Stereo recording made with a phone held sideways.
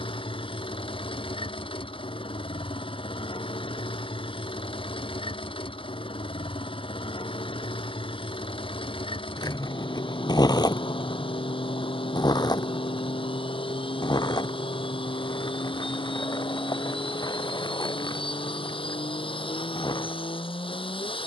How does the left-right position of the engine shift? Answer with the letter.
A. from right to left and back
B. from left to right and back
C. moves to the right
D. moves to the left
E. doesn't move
E.